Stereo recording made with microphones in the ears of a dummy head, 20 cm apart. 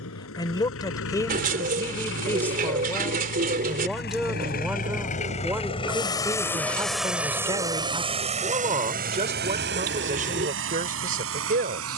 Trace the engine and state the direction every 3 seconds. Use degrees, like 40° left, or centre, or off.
60° left, 40° left, 10° right, 60° right.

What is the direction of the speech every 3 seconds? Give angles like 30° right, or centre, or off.
10° left, centre, 20° right, 40° right.